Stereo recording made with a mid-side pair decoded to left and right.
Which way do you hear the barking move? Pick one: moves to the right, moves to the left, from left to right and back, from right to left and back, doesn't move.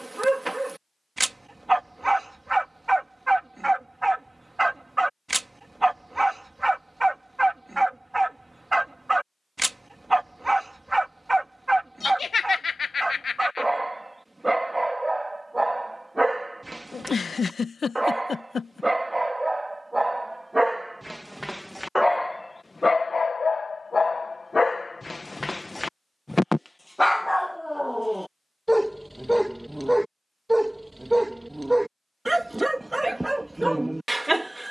from right to left and back.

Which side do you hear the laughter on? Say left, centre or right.
left.